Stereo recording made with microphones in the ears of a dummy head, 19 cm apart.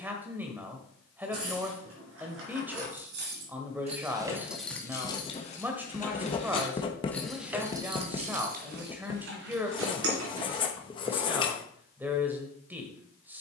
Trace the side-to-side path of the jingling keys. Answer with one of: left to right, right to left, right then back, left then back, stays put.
left then back.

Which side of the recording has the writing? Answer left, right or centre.
left.